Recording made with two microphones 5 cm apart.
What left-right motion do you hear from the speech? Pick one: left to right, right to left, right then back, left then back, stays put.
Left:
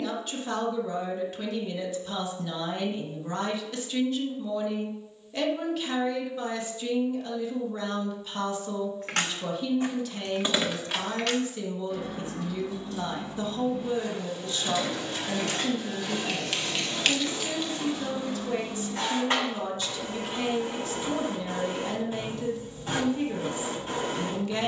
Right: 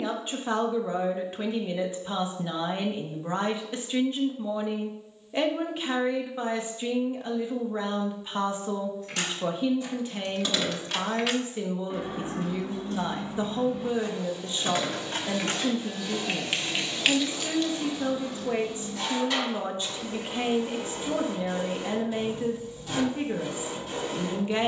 stays put.